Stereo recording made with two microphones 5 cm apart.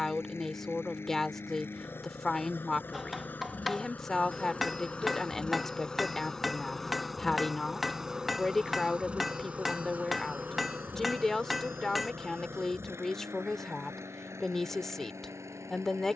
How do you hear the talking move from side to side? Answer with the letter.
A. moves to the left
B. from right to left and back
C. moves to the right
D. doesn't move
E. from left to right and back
D.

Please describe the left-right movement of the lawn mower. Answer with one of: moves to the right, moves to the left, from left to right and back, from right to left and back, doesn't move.
moves to the right.